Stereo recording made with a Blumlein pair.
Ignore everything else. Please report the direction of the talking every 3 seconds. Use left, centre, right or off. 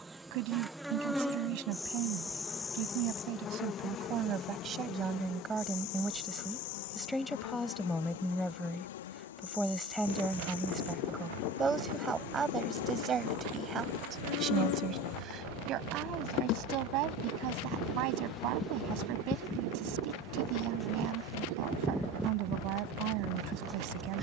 right, right, centre, centre, right, right, right, right.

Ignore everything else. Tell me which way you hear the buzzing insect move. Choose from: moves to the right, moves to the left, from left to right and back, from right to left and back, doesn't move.
from right to left and back.